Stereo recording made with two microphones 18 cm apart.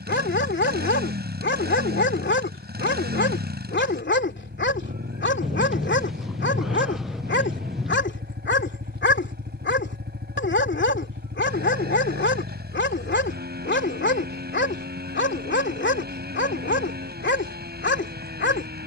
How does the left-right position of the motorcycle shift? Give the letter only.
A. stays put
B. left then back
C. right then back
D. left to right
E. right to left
A.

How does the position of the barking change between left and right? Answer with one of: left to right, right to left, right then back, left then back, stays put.
stays put.